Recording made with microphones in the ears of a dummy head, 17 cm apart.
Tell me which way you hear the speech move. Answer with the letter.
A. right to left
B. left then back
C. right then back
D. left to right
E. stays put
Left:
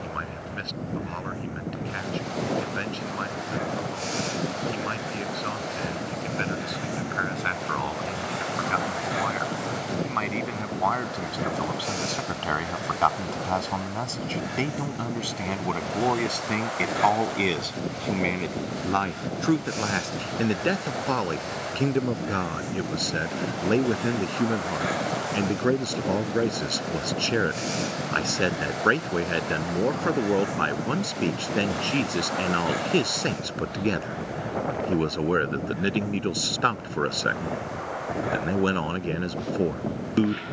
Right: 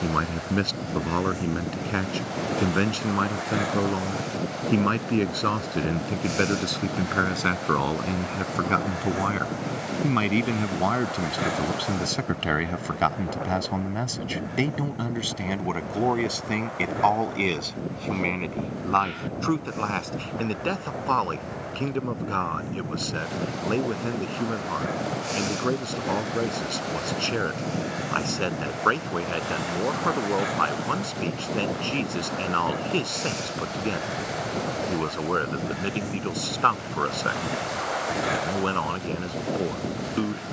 A.